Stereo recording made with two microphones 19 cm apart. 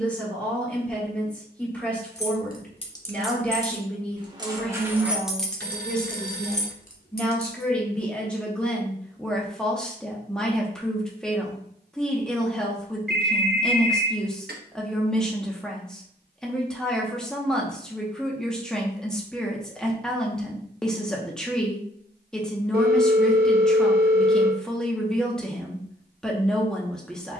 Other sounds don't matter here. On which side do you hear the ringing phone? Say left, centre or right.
right.